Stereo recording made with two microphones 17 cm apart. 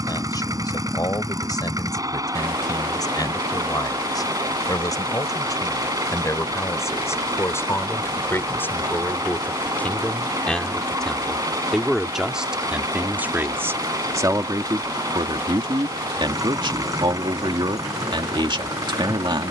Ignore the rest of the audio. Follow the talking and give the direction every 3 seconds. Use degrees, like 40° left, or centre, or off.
20° left, 20° left, 20° left, 10° left, 10° right, 30° right, 30° right.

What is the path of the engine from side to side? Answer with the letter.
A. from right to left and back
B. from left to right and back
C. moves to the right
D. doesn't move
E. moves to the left
D.